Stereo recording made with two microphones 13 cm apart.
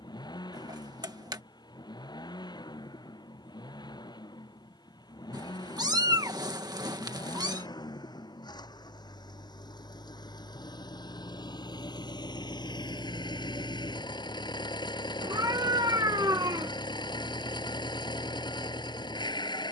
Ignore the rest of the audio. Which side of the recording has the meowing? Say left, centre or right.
right.